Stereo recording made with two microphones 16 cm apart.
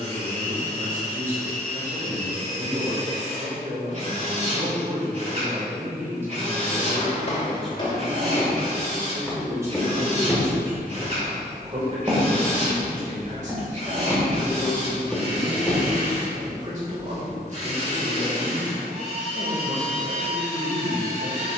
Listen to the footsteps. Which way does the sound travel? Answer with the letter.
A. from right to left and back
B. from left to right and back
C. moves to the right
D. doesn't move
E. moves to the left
B.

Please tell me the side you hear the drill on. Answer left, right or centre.
right.